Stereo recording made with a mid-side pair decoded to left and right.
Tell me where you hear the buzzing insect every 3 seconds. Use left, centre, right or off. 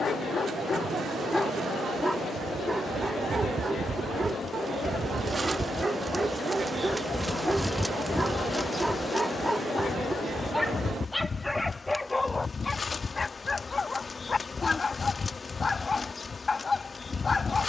right, right, centre, left, left, left.